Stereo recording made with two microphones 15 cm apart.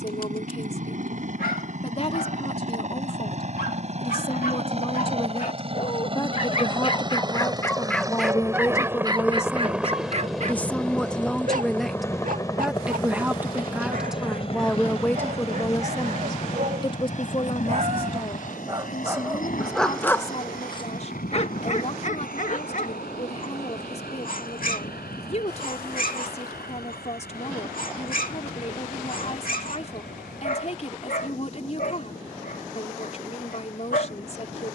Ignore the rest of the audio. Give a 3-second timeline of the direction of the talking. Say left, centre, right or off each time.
left, left, left, centre, centre, left, left, left, left, left, left, left.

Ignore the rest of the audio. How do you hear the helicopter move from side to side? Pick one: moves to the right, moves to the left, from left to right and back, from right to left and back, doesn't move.
moves to the left.